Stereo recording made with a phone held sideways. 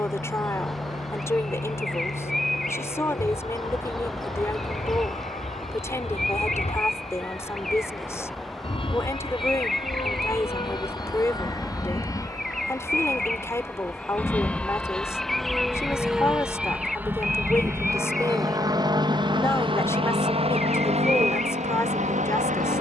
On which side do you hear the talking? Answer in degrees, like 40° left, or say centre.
20° left.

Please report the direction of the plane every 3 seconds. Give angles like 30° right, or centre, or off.
50° left, 50° left, 40° left, 30° left, 10° left, 10° right, 30° right, 50° right.